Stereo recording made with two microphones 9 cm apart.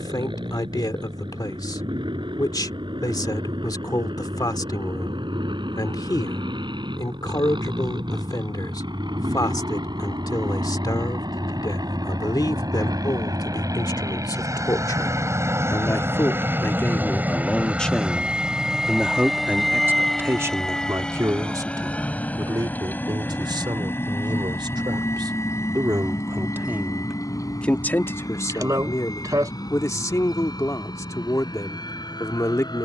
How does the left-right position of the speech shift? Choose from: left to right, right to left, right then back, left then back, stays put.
right then back.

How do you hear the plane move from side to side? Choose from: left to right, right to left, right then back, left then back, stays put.
right to left.